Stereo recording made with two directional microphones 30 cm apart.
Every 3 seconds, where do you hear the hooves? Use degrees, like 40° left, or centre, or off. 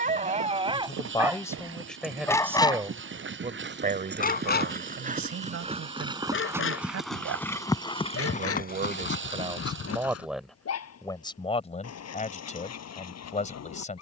50° right, 30° right, 10° left, 50° left, off.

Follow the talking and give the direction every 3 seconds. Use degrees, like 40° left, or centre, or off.
centre, 40° right, 50° right, centre, 20° left.